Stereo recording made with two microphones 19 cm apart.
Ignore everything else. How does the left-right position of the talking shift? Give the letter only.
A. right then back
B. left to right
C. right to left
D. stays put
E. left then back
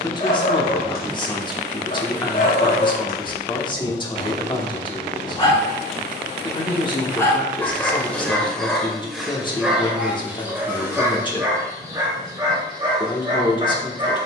D.